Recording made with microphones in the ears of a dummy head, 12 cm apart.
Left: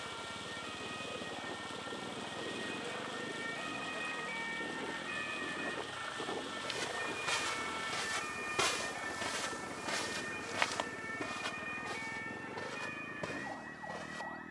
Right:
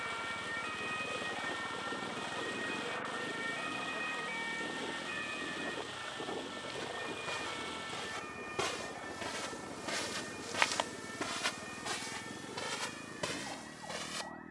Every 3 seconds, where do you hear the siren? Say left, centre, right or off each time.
right, centre, left, left, left.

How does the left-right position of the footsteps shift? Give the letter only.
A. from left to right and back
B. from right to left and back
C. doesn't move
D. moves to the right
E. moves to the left
D.